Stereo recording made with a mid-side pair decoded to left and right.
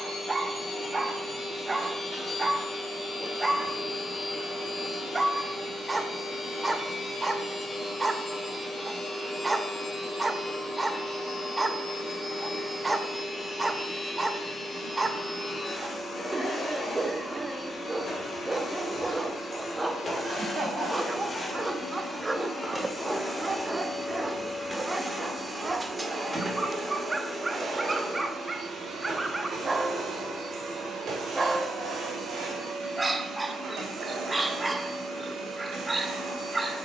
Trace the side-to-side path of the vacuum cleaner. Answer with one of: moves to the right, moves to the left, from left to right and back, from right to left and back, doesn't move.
moves to the right.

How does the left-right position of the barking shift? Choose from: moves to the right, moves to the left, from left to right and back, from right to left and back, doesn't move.
doesn't move.